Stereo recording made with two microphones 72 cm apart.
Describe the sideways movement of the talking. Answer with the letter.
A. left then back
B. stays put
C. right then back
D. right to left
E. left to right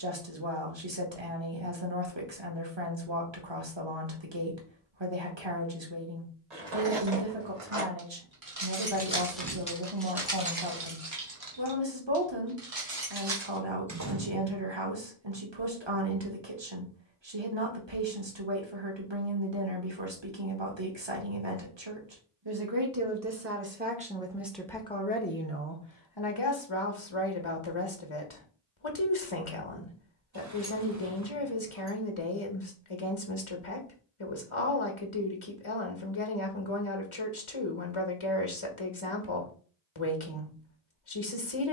D.